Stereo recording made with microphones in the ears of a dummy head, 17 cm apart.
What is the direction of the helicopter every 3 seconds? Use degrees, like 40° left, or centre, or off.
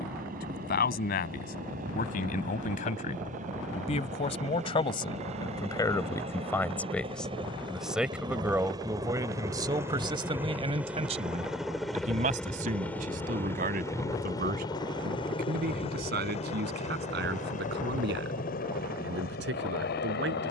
50° right, 40° right, 30° right, 10° right, 10° left, 30° left, 50° left.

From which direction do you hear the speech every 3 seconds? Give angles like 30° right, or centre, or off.
50° left, 30° left, centre, 30° right, 50° right, 60° right, 70° right.